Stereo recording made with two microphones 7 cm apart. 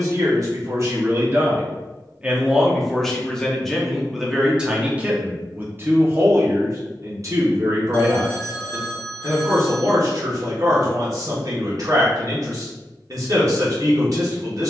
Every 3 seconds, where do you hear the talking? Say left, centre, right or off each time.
right, centre, right, right, right.